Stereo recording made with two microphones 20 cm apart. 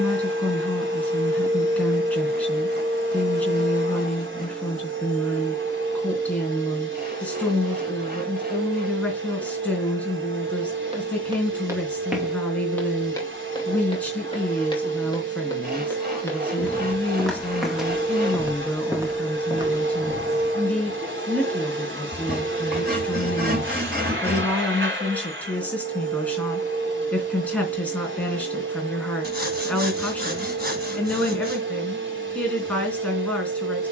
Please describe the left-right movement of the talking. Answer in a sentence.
You can hear the talking stay put.